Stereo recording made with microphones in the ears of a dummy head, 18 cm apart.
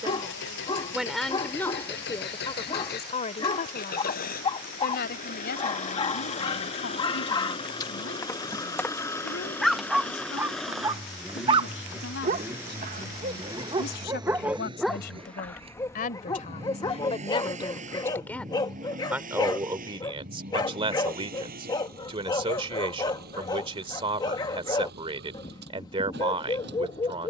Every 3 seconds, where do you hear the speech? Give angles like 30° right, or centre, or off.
10° left, 50° left, 60° left, 70° left, 60° left, 40° left, 10° right, 30° right, 30° right.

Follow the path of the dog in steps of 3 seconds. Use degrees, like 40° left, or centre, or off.
20° left, 20° left, 20° left, 10° right, 20° right, 20° left, 20° left, 20° left, 20° left.